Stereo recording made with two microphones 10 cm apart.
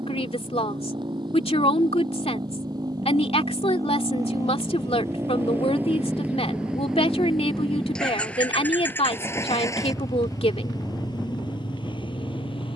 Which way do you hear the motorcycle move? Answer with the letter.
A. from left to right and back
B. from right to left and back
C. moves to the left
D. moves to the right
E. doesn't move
C.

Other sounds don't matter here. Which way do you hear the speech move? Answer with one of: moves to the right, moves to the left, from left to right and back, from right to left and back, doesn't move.
doesn't move.